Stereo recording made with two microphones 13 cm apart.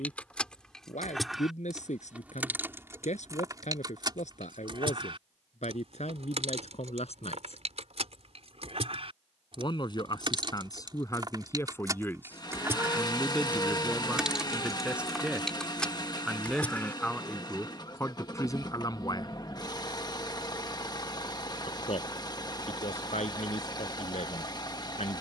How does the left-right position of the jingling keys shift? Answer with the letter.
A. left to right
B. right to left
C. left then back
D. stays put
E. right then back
E.